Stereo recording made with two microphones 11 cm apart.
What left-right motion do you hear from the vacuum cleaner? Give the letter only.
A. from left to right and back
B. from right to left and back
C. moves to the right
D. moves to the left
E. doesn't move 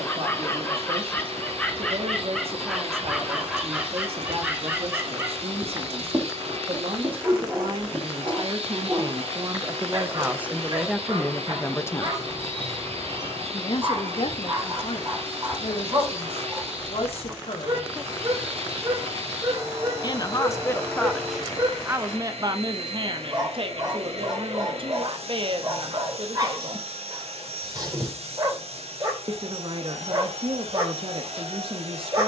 E.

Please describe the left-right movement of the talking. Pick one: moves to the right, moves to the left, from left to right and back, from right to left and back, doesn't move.
from right to left and back.